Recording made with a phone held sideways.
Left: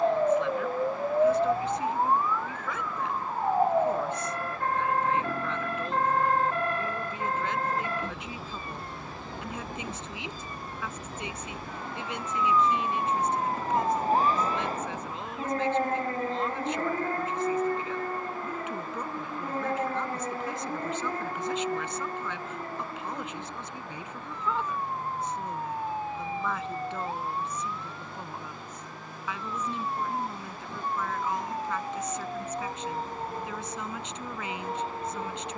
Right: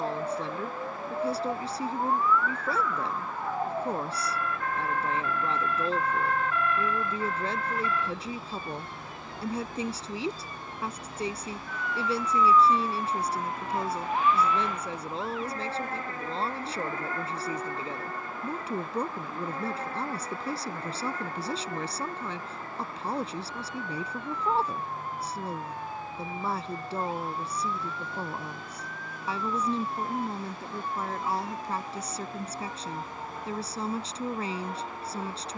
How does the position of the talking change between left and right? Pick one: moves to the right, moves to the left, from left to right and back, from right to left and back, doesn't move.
doesn't move.